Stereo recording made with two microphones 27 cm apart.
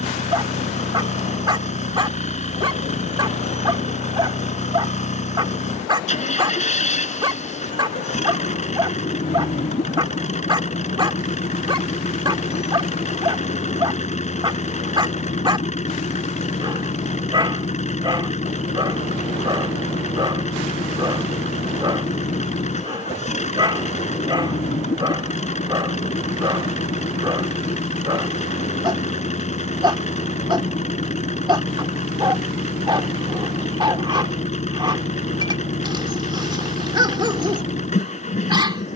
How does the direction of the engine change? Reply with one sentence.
In this clip you hear the engine stay put.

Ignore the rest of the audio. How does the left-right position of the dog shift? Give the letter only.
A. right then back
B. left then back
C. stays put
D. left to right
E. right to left
C.